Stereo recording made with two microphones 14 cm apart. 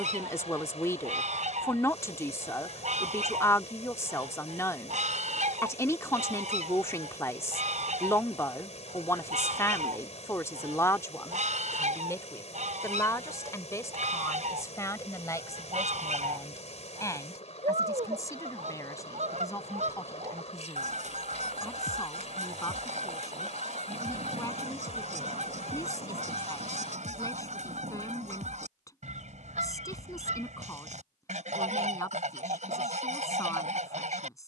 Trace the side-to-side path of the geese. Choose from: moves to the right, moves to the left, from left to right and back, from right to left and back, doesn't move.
doesn't move.